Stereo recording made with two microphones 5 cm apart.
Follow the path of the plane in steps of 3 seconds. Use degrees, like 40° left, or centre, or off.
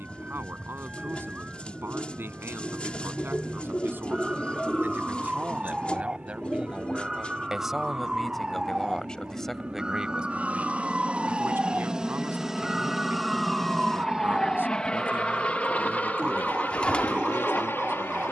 70° right, 60° right, 50° right, 30° right, centre, 40° left.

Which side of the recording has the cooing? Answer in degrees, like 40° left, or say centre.
20° left.